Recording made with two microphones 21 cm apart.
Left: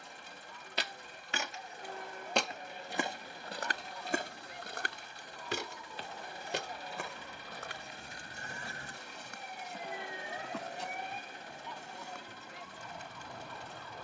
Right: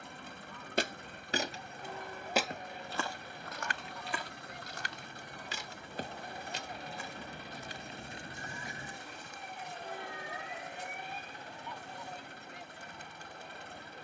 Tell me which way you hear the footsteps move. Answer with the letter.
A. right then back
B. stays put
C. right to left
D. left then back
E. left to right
C.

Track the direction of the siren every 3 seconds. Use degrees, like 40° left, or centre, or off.
60° right, 50° right, 30° right, 20° left, 80° left.